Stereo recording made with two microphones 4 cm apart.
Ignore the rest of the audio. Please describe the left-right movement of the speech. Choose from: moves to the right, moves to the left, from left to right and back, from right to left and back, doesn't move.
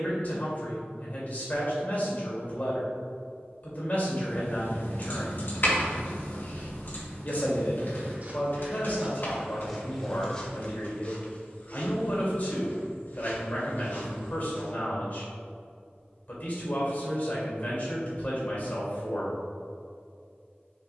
doesn't move.